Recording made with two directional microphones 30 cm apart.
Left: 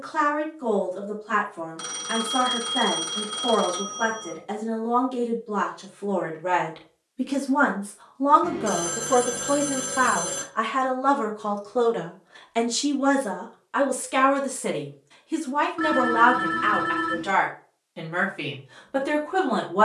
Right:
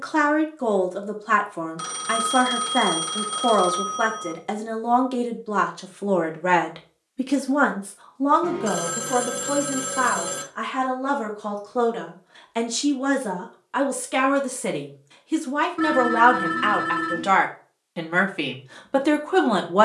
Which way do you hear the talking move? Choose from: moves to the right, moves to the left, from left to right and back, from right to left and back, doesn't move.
from right to left and back.